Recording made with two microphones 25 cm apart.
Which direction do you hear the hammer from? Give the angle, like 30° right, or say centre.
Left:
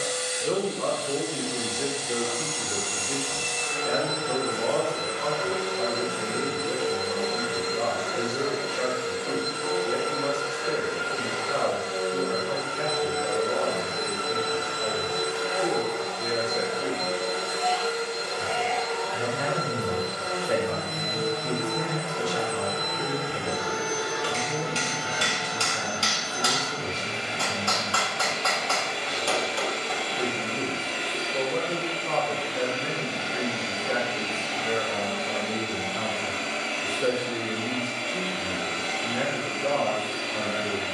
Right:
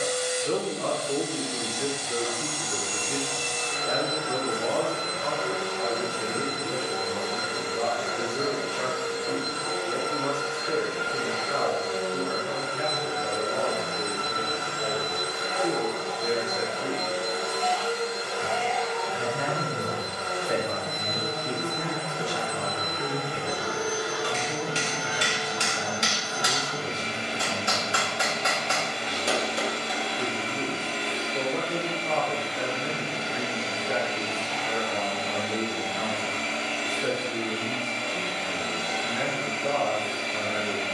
20° right.